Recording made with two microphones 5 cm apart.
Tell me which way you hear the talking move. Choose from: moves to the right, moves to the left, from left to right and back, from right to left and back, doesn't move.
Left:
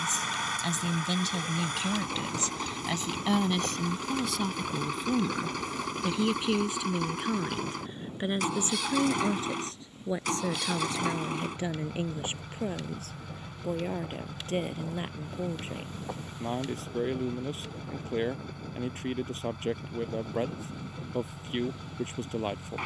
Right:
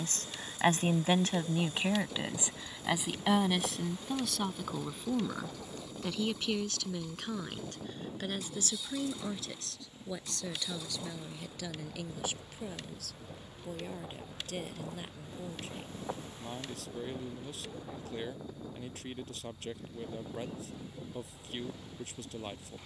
moves to the left.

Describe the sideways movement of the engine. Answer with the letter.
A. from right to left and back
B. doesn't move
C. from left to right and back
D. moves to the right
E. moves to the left
B.